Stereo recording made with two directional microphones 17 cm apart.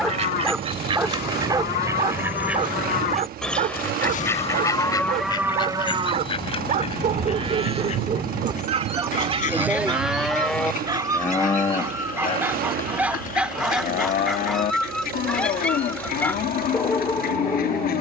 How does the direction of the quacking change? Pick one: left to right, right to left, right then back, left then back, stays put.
right to left.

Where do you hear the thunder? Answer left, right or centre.
right.